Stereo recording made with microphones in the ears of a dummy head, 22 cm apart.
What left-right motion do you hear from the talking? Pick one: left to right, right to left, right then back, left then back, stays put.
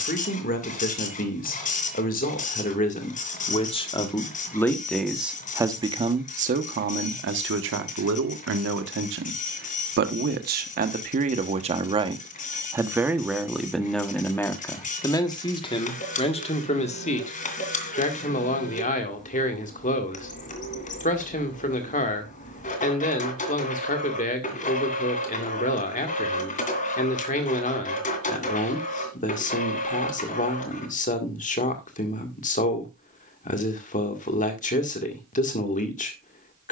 right then back.